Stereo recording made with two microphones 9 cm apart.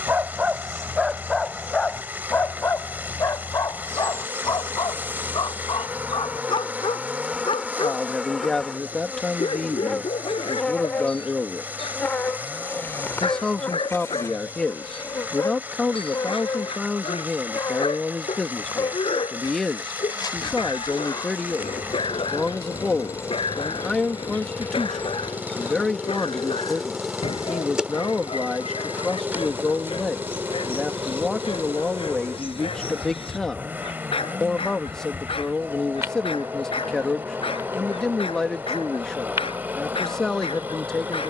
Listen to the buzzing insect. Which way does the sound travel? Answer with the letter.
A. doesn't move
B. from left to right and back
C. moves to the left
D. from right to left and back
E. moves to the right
D.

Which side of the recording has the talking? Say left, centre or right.
centre.